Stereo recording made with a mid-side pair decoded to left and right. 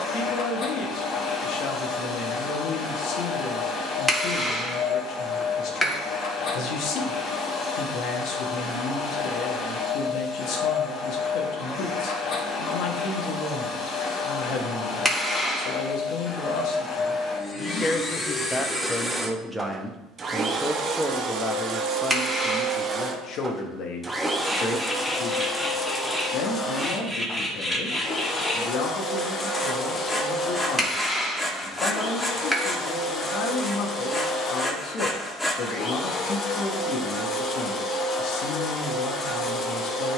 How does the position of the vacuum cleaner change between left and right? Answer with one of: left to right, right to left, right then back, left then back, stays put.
right then back.